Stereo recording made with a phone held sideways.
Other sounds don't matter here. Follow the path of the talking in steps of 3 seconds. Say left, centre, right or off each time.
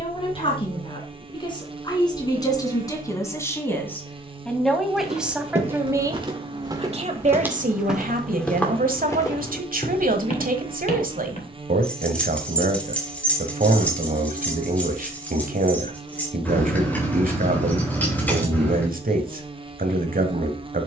left, centre, right, right, right, right, right.